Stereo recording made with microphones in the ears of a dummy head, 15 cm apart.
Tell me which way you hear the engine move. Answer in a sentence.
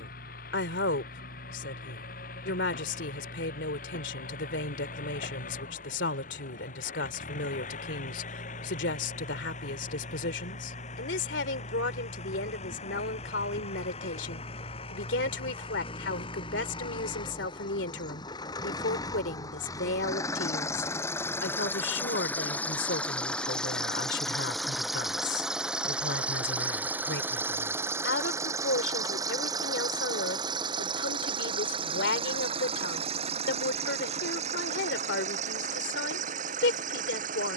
In this clip you hear the engine go from the left side to the right.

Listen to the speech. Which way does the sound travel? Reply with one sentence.
You can hear the speech stay put.